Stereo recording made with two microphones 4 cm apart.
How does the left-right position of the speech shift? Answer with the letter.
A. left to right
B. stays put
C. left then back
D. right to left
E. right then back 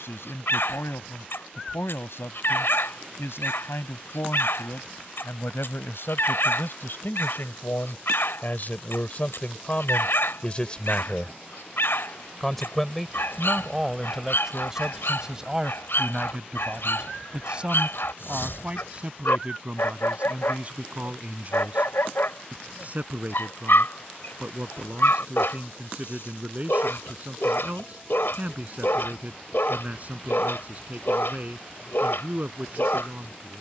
A.